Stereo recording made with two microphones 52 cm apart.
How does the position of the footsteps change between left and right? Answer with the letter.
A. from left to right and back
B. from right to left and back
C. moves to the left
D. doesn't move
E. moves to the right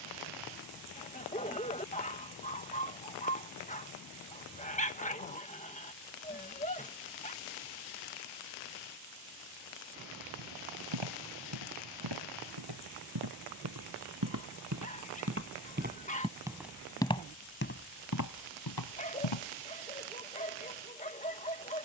C.